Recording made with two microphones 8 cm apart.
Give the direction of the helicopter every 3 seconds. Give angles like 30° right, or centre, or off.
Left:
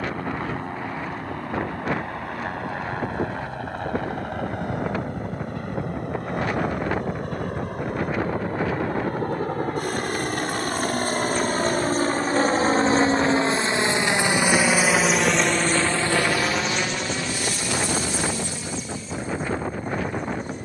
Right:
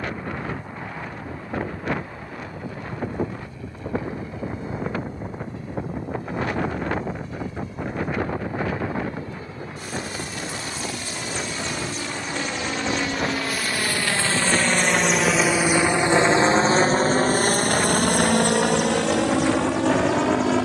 60° left, 60° left, 60° left, 50° left, 20° left, 30° right, 60° right.